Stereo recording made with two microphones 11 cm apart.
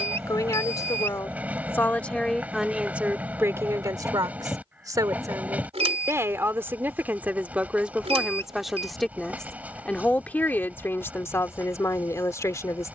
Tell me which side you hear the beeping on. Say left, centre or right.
right.